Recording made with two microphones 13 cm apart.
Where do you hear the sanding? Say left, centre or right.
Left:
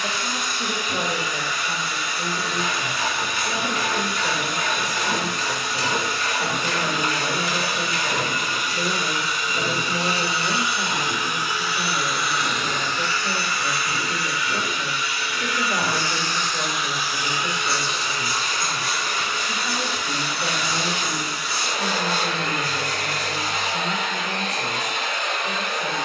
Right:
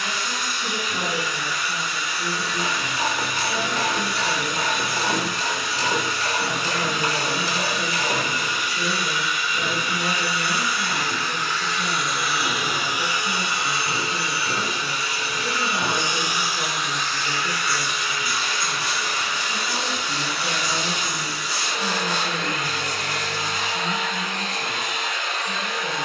right.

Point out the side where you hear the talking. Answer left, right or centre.
left.